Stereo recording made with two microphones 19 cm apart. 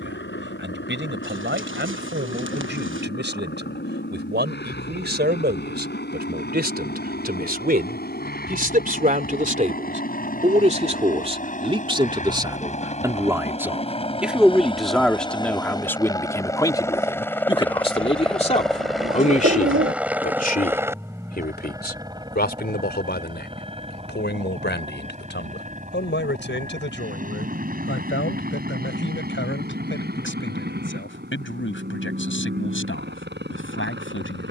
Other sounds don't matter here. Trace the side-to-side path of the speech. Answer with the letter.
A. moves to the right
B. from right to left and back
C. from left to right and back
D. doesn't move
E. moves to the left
E.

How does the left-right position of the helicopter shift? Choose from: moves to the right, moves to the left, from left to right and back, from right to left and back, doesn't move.
moves to the right.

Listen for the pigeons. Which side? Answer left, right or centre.
right.